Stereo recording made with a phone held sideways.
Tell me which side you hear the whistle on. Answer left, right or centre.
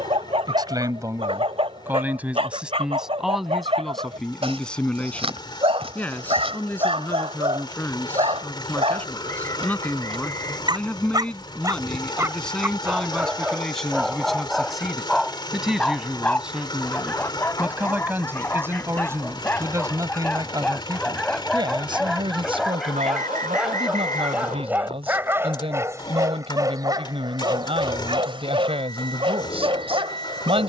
right.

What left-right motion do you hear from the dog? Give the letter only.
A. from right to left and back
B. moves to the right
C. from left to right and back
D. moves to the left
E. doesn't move
A.